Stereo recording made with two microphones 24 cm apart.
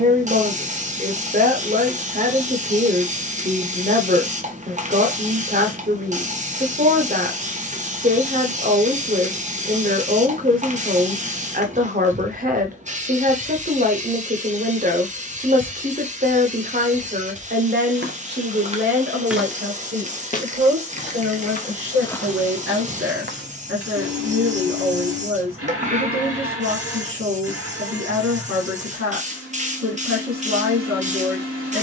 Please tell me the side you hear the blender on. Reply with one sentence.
In this clip you hear the blender on the right.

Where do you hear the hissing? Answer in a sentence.
You can hear the hissing on the right.